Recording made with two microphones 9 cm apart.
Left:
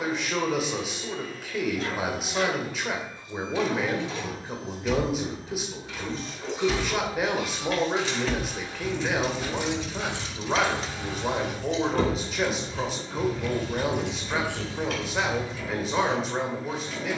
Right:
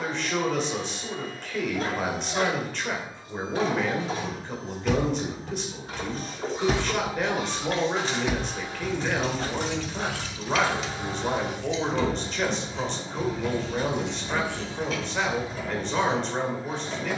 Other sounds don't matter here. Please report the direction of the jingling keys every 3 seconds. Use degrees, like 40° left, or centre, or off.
off, 60° right, 30° right, 30° left, 60° left, 70° left.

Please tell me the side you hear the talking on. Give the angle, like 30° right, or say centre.
10° left.